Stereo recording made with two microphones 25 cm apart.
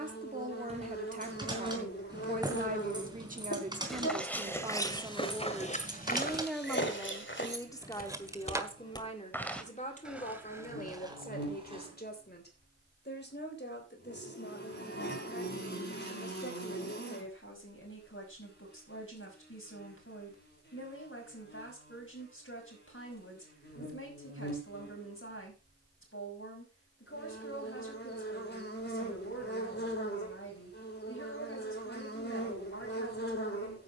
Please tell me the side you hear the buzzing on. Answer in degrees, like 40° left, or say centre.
40° left.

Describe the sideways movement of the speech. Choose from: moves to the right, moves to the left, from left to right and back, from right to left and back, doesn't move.
moves to the left.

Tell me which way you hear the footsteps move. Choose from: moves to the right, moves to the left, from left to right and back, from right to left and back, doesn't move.
from right to left and back.